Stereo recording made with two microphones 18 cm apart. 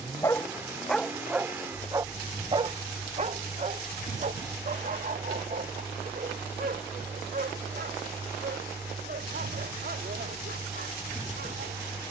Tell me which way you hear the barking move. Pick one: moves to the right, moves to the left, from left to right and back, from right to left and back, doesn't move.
moves to the right.